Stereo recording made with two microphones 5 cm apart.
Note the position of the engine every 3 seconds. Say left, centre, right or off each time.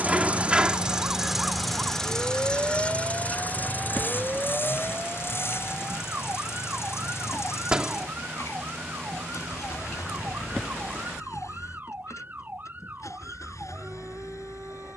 centre, left, left, left, left.